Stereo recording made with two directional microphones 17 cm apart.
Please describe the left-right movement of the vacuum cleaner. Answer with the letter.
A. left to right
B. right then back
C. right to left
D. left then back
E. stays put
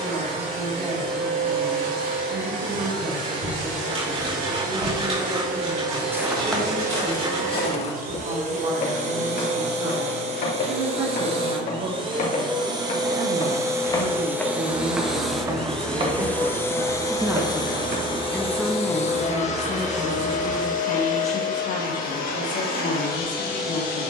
C.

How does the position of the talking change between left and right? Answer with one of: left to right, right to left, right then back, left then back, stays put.
right to left.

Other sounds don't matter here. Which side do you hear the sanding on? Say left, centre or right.
right.